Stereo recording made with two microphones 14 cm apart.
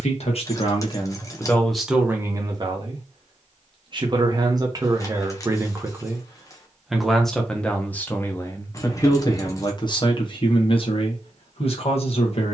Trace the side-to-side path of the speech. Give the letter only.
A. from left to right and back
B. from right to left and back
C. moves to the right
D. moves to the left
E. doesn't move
A.